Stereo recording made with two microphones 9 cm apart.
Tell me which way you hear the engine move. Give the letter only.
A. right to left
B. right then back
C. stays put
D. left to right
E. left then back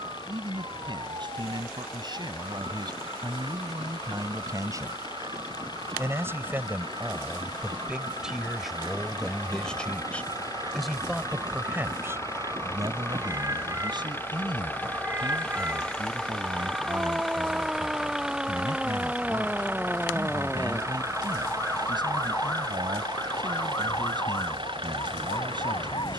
D.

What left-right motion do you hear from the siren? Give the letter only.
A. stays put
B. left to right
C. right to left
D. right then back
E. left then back
C.